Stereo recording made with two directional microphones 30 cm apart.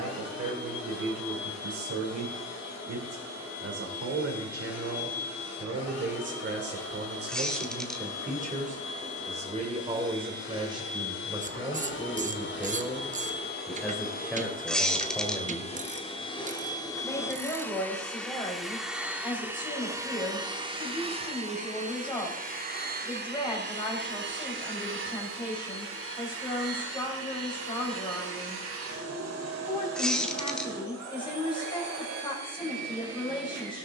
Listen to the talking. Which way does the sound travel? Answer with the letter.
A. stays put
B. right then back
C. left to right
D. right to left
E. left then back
D.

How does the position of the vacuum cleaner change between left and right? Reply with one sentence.
In this clip you hear the vacuum cleaner go from the left side to the right.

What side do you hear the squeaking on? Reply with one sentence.
In this clip you hear the squeaking in the centre.